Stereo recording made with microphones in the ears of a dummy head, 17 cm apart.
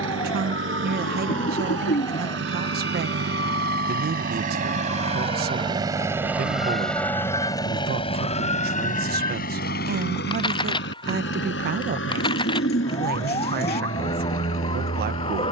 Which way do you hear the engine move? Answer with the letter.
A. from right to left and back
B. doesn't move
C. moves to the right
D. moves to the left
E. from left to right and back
D.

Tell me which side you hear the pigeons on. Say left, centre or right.
left.